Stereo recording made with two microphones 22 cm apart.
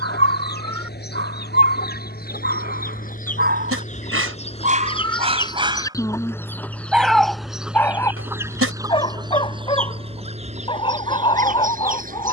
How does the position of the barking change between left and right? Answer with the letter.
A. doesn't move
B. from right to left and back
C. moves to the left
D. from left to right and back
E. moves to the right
C.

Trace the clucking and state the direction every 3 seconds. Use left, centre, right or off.
left, left, centre, right.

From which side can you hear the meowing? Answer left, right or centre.
right.